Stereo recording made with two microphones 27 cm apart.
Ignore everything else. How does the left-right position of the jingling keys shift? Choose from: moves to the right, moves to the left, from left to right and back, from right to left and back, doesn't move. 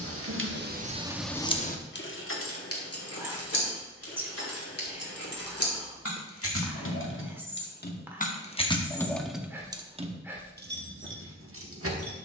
from right to left and back.